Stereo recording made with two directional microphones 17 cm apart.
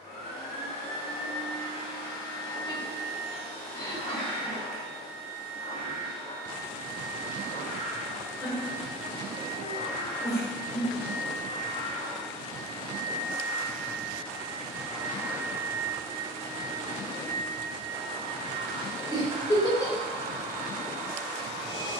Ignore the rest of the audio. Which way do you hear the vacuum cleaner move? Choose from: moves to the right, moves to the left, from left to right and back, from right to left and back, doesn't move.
moves to the right.